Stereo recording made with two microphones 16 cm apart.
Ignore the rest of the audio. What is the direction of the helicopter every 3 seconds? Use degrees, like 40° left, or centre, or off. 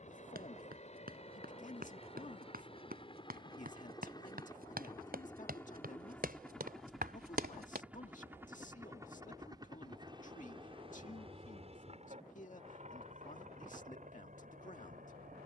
40° left, 20° left, centre, 30° right, 50° right.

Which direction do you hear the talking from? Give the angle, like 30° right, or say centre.
50° left.